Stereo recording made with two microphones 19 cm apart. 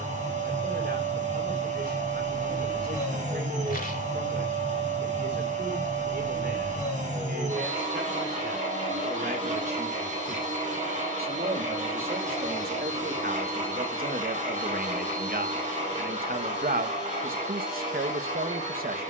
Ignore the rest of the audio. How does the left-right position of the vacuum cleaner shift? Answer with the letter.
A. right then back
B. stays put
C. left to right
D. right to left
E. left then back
B.